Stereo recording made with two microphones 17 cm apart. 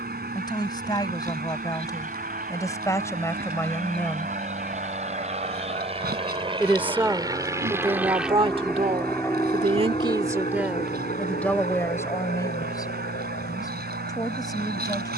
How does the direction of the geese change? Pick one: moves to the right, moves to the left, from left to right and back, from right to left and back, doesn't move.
doesn't move.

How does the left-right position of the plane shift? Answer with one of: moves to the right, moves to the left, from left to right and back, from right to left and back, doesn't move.
moves to the left.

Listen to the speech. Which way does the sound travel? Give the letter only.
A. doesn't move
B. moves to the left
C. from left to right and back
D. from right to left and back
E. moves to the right
C.